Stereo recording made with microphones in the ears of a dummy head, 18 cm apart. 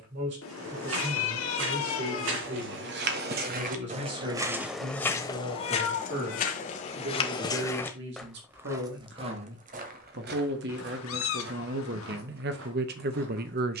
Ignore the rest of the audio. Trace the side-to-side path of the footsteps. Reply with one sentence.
You can hear the footsteps go left and come back.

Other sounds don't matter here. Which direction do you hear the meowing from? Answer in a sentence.
You can hear the meowing on the left.